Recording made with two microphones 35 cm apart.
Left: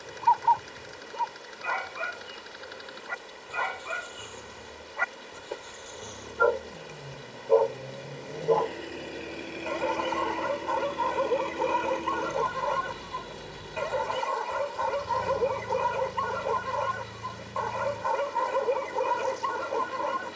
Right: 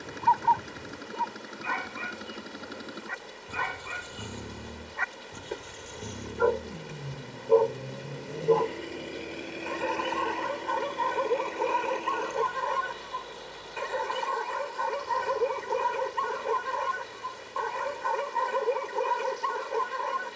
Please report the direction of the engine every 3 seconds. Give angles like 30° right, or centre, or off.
70° right, 50° right, 20° right, 10° left, 40° left, 50° left, 60° left.